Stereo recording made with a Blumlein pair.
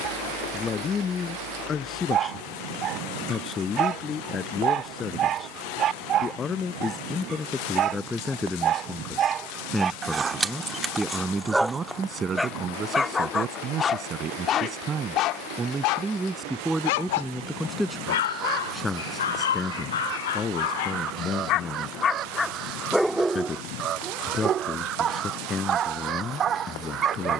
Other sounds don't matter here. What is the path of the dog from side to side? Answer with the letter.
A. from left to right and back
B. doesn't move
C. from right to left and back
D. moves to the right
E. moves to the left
C.